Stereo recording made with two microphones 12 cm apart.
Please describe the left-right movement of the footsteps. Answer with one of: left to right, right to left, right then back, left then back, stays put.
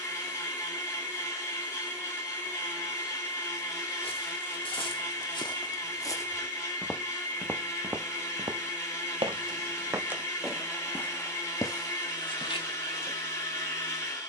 right then back.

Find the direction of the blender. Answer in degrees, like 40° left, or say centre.
20° left.